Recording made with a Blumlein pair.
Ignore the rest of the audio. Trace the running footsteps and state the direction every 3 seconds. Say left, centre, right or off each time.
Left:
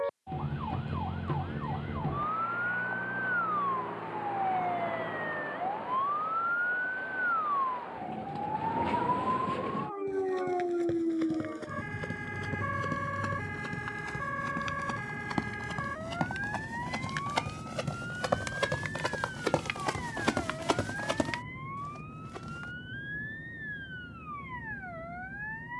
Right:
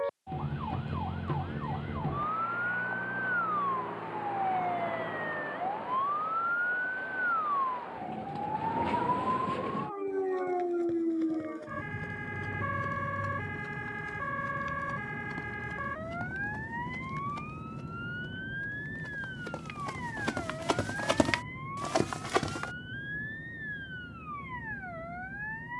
off, off, off, left, left, left, left, right, off.